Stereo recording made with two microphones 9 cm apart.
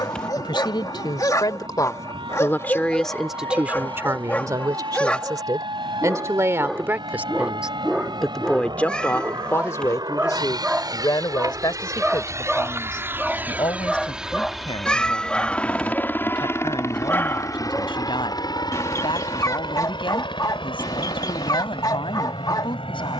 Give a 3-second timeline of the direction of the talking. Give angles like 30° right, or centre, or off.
40° left, 30° right, 10° right, 40° left, 60° left, 70° left, 70° left, 70° left.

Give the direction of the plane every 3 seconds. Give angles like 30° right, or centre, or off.
80° right, 70° right, 70° right, 50° right, 20° right, 20° left, 50° left, 60° left.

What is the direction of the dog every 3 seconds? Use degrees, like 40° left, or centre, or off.
40° left, 20° left, centre, 10° right, centre, 20° left, 40° left, 50° left.